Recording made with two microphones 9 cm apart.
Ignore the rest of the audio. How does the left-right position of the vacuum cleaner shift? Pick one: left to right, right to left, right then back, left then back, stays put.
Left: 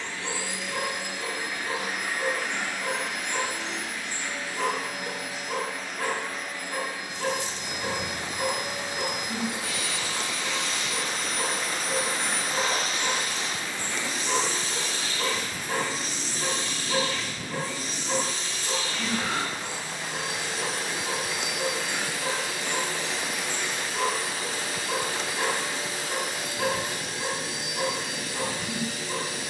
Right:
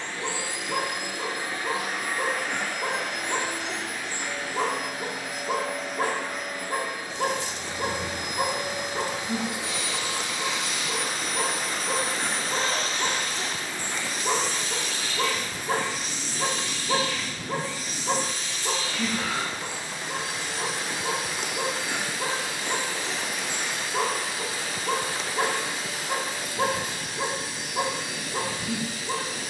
right to left.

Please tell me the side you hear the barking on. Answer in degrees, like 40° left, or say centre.
50° right.